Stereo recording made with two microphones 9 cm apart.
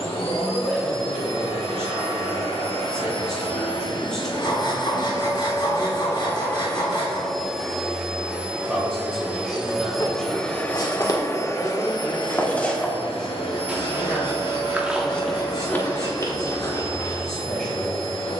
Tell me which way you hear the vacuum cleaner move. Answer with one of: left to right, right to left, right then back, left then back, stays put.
right then back.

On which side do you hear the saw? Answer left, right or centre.
left.